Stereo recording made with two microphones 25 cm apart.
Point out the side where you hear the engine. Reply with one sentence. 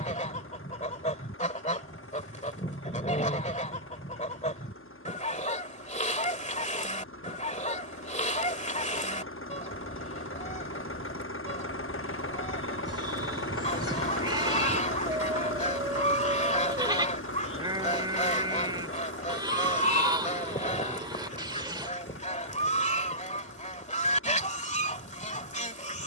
You can hear the engine on the left.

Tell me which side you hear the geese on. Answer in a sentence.
In this clip you hear the geese on the left.